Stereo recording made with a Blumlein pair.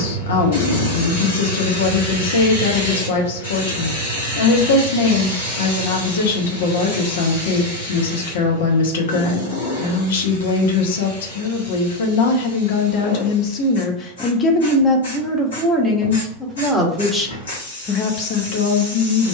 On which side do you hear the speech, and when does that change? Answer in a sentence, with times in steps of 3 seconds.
In this clip you hear the speech on the left from 0 s, in the centre from 15 s and on the left from 18 s.